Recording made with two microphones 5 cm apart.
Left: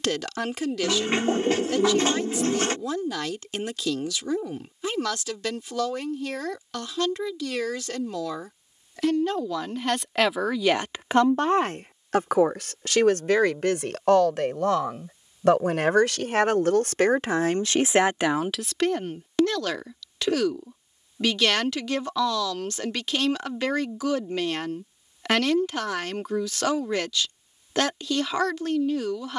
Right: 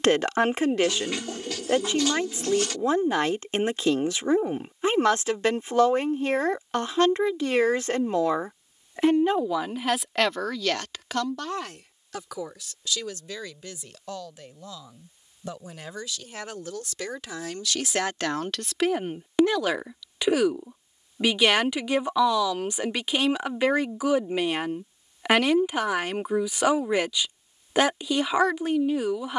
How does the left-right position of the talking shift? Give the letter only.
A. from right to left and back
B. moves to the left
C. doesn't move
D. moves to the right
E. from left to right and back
A.